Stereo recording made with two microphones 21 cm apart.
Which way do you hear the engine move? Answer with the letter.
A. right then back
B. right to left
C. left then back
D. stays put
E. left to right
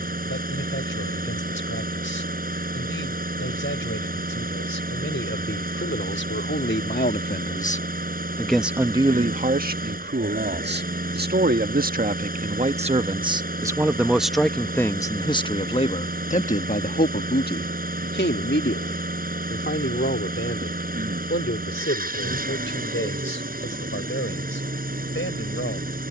D.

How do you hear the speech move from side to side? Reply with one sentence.
In this clip you hear the speech move from left to right and back again.